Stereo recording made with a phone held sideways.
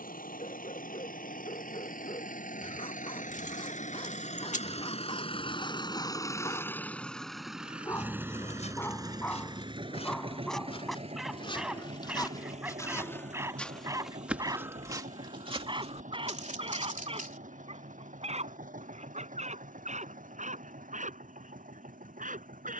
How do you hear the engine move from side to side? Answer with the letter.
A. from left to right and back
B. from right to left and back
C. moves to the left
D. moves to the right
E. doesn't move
D.